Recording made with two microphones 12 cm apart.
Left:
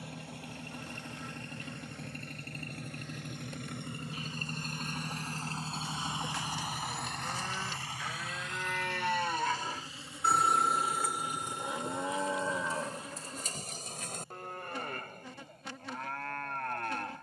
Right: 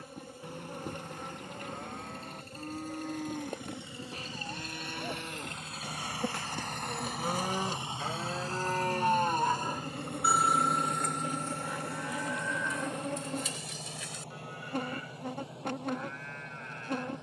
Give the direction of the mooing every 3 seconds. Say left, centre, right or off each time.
right, right, right, centre, left, left.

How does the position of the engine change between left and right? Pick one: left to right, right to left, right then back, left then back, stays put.
left to right.